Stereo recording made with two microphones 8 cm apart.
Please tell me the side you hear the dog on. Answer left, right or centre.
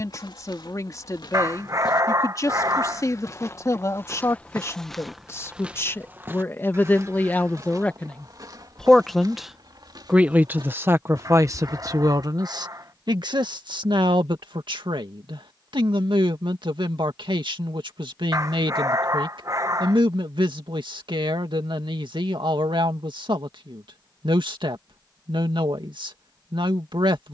right.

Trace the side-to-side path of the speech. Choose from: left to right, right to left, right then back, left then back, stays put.
left to right.